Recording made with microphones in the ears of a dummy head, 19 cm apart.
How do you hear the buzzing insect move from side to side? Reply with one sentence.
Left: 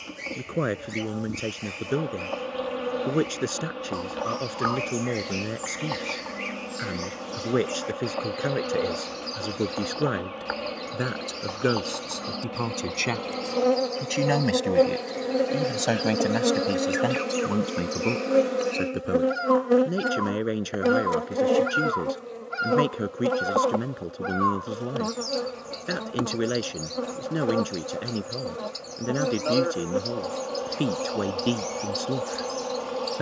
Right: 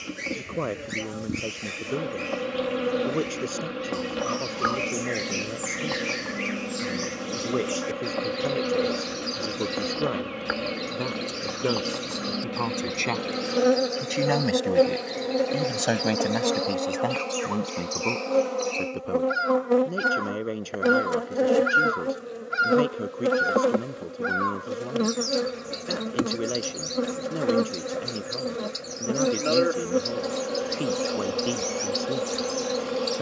In this clip you hear the buzzing insect move from right to left and back again.